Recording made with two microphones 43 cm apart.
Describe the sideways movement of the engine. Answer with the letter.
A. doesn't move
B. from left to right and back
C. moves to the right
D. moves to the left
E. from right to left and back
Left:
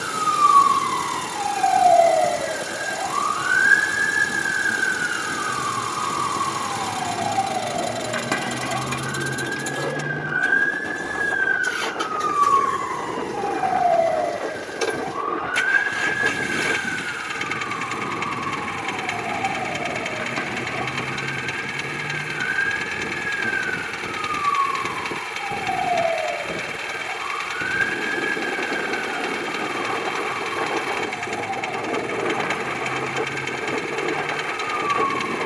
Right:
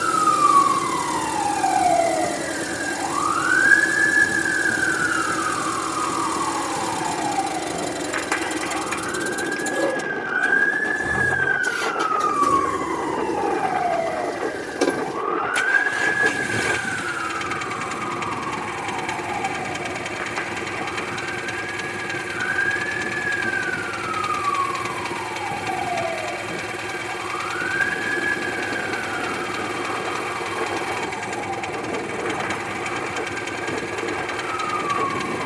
A.